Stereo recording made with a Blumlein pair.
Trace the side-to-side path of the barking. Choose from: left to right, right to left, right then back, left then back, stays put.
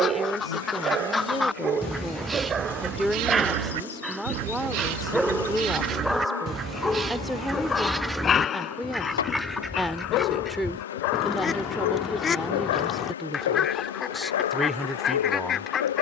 right to left.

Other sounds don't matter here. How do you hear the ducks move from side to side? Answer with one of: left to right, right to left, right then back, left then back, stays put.
right then back.